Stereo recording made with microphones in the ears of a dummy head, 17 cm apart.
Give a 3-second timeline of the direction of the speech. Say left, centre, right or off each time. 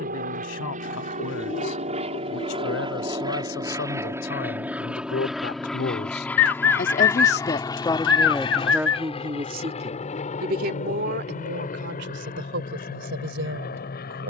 left, left, left, right, right.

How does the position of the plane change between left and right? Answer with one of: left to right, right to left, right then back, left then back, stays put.
right to left.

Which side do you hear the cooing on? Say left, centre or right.
left.